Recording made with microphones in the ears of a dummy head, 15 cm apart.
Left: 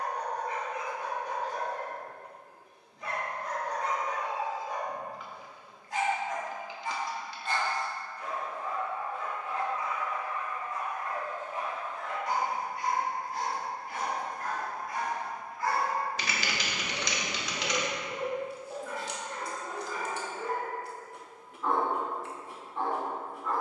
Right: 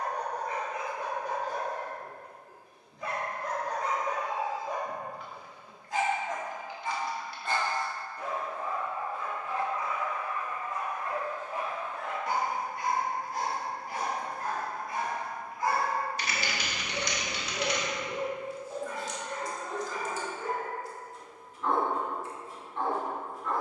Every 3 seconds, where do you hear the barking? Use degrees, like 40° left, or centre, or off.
70° right, 70° right, 70° right, 60° right, 40° right, 10° right, centre, 10° left.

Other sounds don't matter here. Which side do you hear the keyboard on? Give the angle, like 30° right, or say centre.
60° left.